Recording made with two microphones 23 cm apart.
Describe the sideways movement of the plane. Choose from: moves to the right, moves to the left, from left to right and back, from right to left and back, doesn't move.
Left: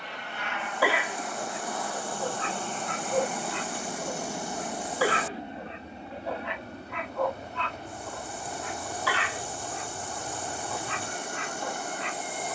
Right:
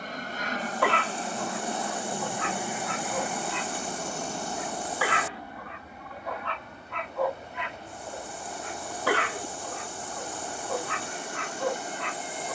moves to the left.